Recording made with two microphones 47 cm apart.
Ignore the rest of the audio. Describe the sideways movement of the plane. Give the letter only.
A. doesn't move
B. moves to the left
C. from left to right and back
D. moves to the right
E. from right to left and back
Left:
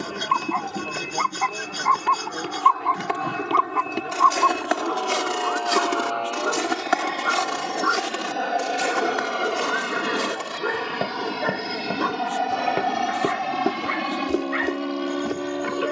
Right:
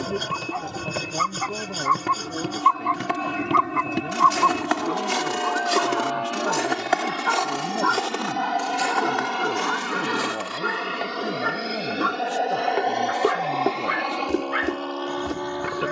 B.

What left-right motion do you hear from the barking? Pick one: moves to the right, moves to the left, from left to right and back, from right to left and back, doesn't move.
moves to the right.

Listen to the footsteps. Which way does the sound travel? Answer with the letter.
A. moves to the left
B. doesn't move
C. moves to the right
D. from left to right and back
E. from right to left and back
E.